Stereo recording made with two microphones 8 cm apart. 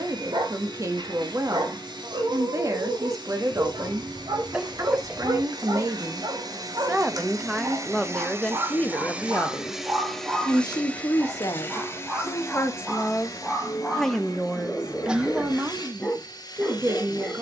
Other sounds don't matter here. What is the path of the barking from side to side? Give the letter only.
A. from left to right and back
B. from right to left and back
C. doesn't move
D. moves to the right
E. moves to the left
E.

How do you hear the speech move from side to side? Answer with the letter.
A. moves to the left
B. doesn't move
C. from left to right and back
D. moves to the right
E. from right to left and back
E.